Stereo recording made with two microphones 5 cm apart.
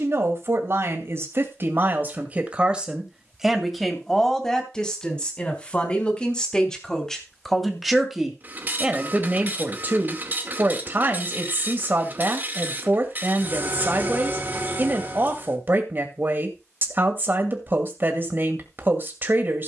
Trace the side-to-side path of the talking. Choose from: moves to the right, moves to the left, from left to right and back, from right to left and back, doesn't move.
from right to left and back.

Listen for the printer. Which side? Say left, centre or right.
right.